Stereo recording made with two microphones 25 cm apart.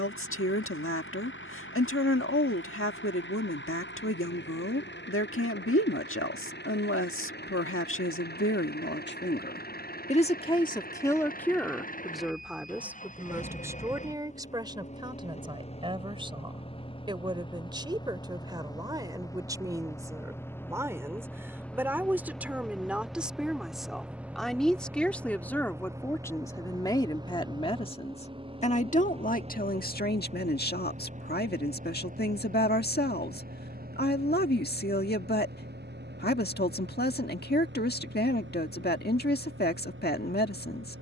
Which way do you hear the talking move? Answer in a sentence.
You can hear the talking go right and come back.